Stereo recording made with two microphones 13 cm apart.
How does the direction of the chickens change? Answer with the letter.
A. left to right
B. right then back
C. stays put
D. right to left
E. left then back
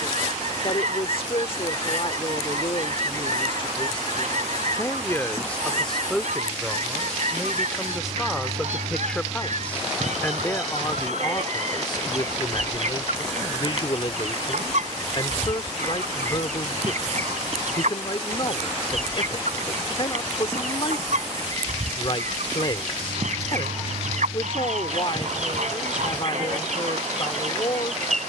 C.